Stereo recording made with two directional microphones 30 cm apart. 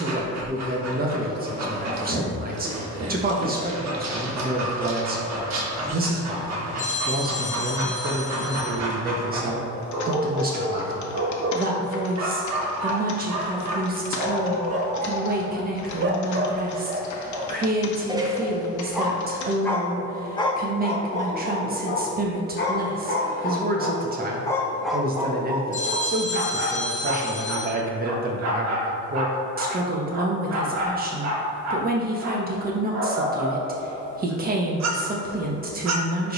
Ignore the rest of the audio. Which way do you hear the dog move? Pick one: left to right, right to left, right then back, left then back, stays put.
left then back.